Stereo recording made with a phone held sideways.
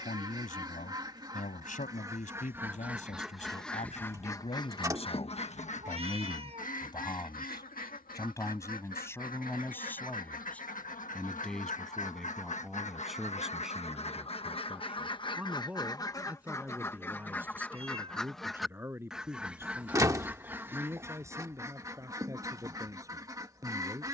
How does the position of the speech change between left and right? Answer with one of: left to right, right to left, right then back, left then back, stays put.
left to right.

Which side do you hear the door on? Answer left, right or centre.
right.